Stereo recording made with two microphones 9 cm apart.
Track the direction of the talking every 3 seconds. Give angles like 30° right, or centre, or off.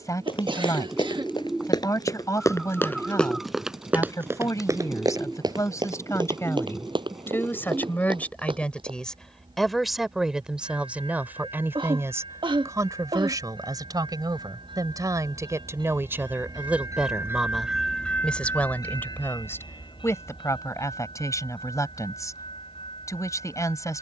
40° left, 40° left, 20° left, 10° right, 40° right, 20° right, 30° left, 40° left.